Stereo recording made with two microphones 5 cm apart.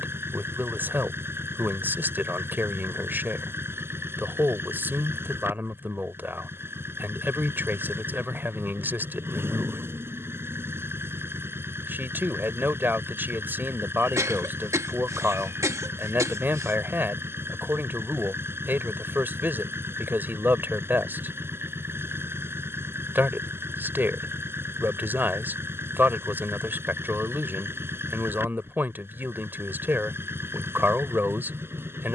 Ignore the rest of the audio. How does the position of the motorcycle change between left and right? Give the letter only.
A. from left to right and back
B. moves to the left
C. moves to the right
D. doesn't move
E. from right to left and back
D.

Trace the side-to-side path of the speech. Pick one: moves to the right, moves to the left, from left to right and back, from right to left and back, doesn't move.
doesn't move.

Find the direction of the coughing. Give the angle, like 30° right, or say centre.
70° right.